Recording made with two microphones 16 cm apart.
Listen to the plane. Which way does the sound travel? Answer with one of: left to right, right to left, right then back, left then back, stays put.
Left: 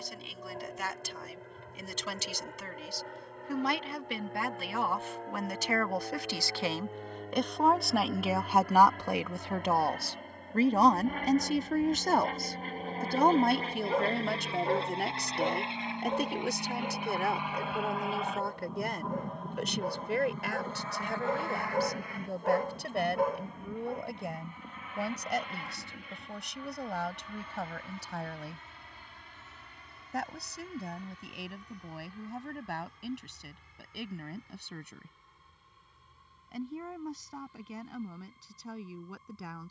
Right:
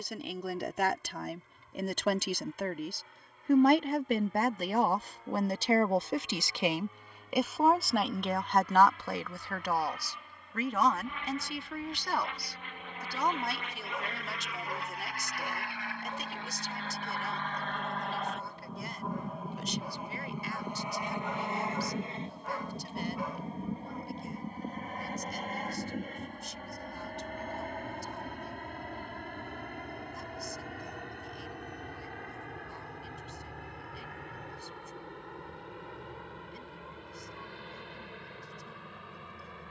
left to right.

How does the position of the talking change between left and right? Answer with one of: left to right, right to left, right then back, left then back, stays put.
right to left.